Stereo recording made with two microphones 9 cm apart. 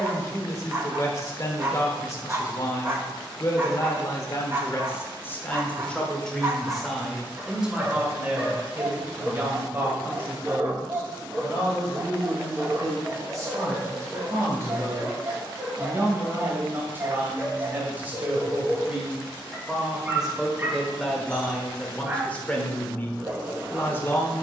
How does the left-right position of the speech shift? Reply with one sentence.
You can hear the speech move from left to right and back again.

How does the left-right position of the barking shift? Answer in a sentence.
You can hear the barking stay in one place.